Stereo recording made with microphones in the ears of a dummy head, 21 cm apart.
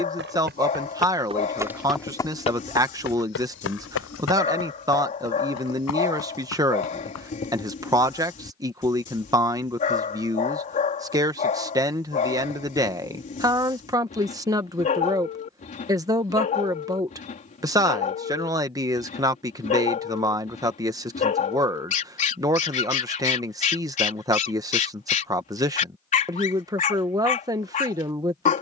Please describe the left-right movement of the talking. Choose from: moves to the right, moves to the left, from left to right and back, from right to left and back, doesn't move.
doesn't move.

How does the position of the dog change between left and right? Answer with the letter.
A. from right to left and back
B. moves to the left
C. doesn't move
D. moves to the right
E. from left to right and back
C.